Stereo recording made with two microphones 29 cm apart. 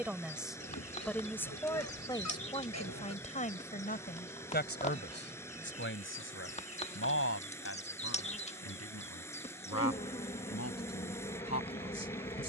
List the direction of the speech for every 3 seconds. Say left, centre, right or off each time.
centre, left, left, left.